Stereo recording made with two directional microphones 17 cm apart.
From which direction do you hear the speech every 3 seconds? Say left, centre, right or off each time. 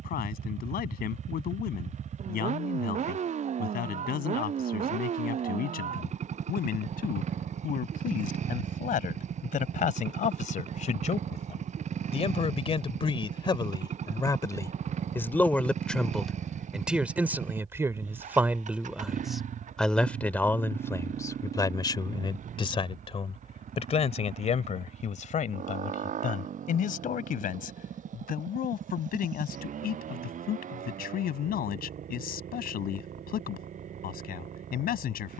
left, left, left, left, left, centre, centre, left, left, left, left, left.